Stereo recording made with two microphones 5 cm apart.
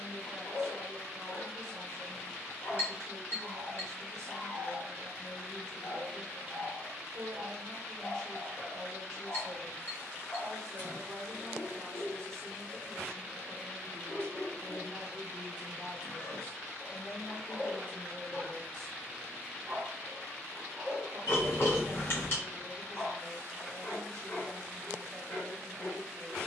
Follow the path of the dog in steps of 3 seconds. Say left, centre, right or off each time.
left, left, left, left, left, left, centre, left, left.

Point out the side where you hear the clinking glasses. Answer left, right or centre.
left.